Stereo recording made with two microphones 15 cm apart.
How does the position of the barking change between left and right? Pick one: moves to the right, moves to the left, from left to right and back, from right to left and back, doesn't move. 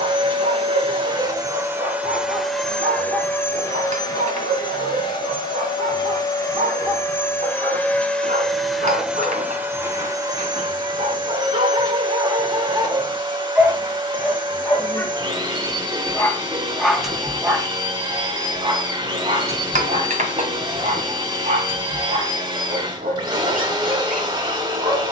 from right to left and back.